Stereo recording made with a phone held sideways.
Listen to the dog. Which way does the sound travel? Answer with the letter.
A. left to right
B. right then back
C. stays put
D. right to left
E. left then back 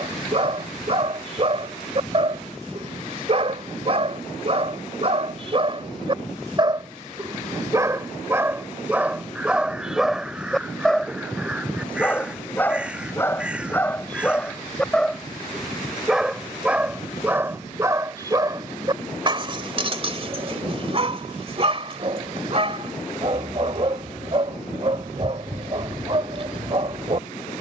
E.